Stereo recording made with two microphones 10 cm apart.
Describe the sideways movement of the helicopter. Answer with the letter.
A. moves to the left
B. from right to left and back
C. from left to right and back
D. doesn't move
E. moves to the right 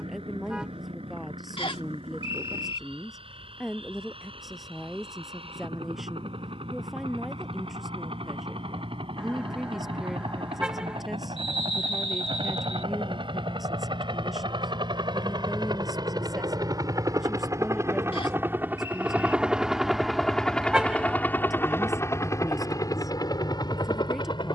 A.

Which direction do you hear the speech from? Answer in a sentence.
In this clip you hear the speech in the centre.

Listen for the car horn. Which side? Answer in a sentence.
In this clip you hear the car horn in the centre.